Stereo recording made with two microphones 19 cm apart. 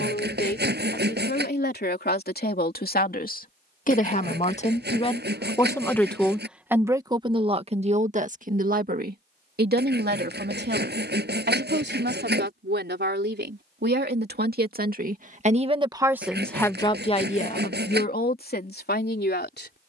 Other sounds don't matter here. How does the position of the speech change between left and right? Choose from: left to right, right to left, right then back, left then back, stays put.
right then back.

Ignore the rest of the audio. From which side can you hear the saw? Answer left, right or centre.
right.